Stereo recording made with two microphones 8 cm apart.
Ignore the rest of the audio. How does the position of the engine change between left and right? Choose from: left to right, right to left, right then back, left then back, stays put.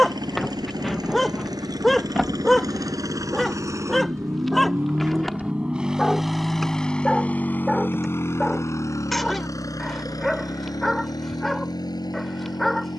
right to left.